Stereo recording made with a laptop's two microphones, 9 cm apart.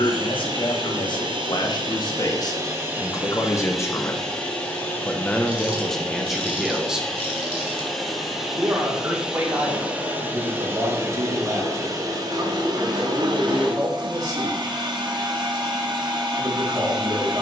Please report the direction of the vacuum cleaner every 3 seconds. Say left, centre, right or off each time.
right, centre, centre, right, right, right.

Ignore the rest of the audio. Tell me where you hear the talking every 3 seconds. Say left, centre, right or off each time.
left, left, centre, right, right, right.